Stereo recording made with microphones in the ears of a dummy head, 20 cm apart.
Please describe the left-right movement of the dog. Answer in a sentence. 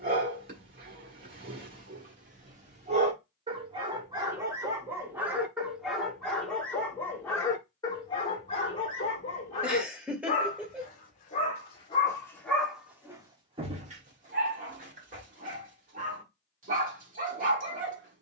In this clip you hear the dog go left and come back.